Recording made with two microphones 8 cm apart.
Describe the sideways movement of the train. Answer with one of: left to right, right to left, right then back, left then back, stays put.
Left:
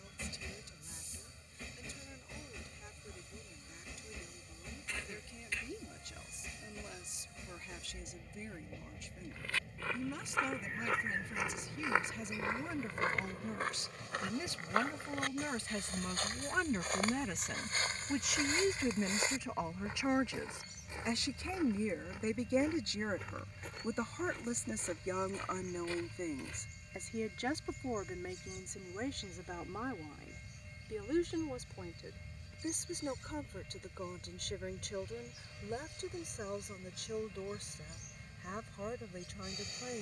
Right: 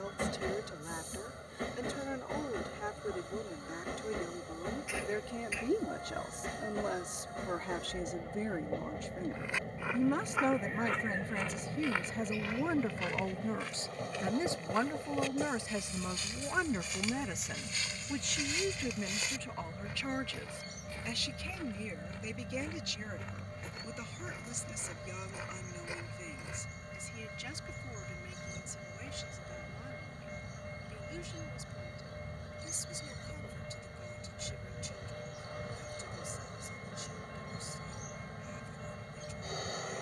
stays put.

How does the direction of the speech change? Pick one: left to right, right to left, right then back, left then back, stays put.
right to left.